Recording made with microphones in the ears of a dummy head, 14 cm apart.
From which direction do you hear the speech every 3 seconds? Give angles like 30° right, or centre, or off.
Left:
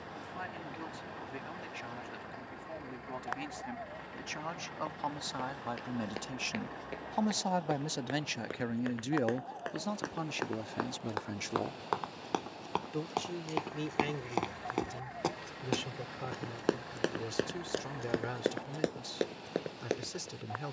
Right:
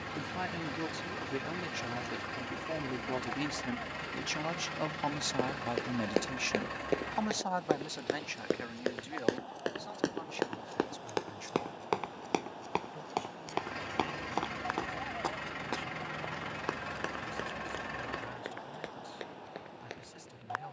50° right, 30° right, 20° left, 60° left, 80° left, 80° left, 80° left.